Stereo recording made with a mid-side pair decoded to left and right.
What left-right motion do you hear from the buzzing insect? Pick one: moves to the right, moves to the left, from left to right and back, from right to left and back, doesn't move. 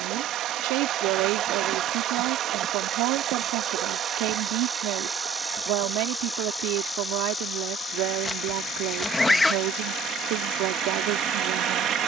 moves to the left.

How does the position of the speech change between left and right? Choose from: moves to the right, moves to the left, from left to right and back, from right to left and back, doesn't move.
doesn't move.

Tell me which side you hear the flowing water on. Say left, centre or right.
right.